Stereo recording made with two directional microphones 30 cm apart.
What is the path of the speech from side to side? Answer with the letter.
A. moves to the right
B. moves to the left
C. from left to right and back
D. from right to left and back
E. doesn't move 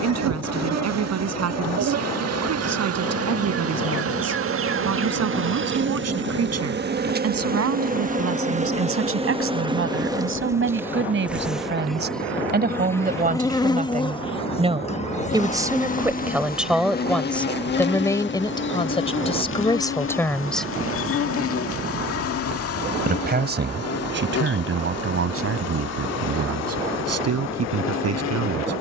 D.